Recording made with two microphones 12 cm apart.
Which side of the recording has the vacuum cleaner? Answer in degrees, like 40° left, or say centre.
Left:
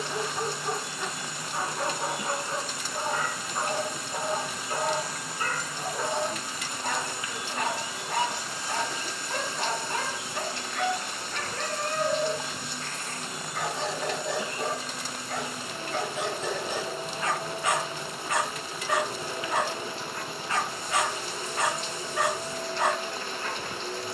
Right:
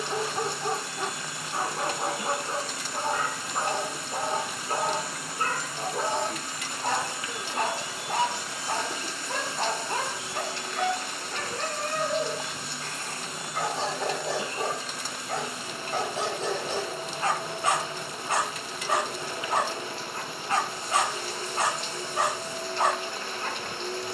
centre.